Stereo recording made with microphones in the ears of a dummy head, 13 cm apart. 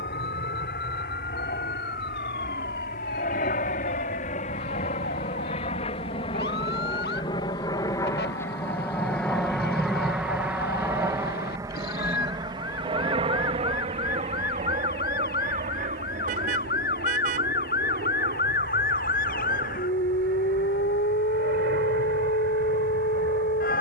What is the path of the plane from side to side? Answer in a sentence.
In this clip you hear the plane move to the right.